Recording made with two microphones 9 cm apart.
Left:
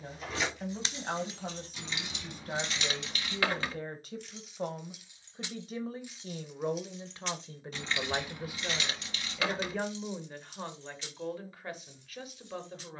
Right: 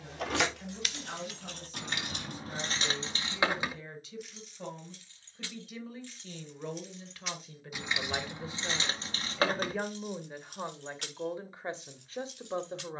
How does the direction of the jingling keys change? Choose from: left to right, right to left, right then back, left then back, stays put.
left then back.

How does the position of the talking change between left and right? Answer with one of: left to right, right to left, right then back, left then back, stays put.
left to right.